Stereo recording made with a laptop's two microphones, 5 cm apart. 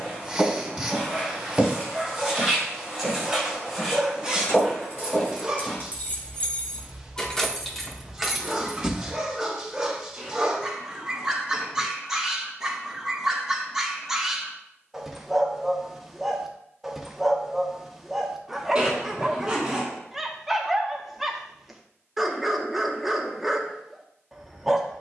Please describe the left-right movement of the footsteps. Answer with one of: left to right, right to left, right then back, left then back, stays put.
right to left.